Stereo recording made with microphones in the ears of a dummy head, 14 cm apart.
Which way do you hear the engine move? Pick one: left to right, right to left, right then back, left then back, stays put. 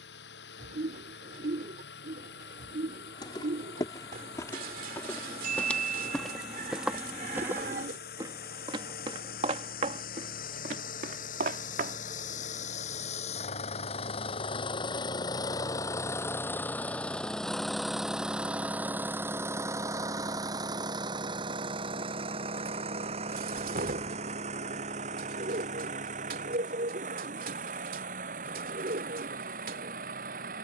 left to right.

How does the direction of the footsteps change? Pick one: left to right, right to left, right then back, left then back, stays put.
left to right.